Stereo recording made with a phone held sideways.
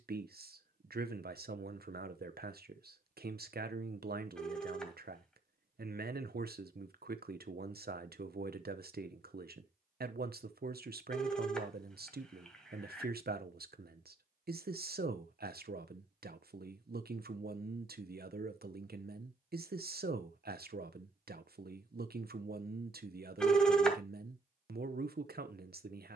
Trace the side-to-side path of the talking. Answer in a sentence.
You can hear the talking stay in one place.